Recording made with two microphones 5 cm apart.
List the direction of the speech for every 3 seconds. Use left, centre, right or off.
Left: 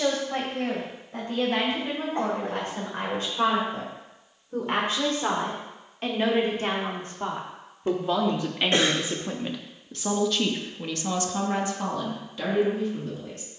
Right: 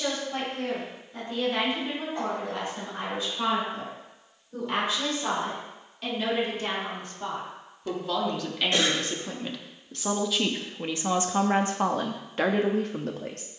left, left, left, centre, right.